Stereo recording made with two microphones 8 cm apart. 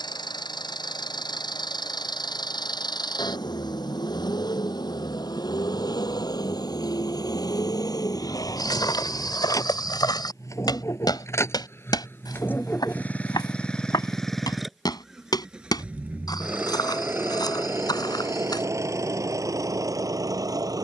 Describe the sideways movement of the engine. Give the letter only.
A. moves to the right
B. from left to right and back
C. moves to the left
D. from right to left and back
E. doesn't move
A.